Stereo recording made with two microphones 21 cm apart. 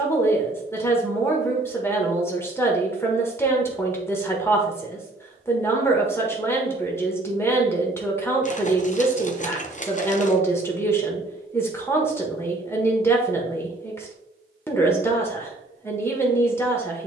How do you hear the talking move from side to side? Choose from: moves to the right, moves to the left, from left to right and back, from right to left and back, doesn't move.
doesn't move.